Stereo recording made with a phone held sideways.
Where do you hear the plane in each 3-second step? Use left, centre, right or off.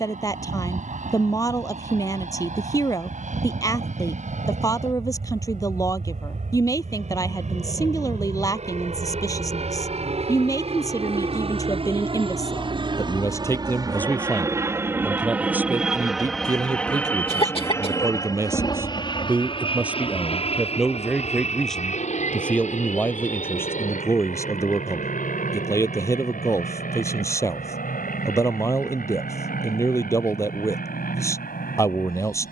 right, right, right, right, right, centre, left, left, left, left, left.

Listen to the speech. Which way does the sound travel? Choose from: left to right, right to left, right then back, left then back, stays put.
right then back.